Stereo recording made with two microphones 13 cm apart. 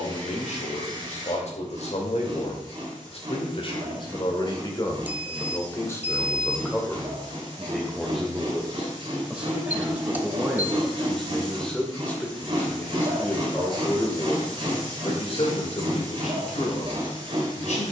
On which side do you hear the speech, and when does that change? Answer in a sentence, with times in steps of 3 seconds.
In this clip you hear the speech on the left from 0 s, in the centre from 6 s and on the left from 12 s.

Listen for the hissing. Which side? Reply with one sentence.
You can hear the hissing on the right.